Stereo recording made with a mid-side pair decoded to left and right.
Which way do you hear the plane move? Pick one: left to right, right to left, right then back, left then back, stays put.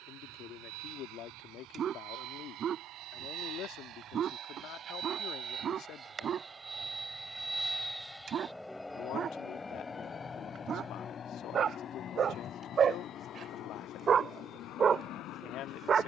right to left.